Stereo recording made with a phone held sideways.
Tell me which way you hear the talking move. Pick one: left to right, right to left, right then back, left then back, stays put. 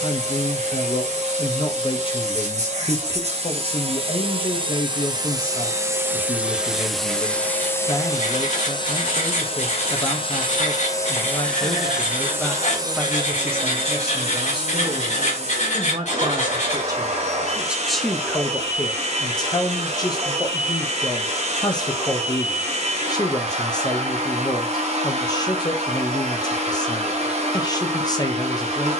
right then back.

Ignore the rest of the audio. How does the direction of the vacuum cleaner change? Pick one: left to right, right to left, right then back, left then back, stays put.
left then back.